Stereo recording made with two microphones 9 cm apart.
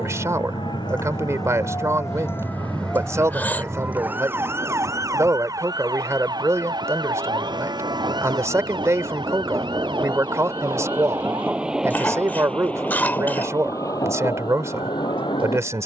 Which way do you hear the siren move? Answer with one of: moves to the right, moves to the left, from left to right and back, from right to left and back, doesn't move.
moves to the right.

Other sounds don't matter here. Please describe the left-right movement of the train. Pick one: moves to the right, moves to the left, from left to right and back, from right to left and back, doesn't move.
moves to the left.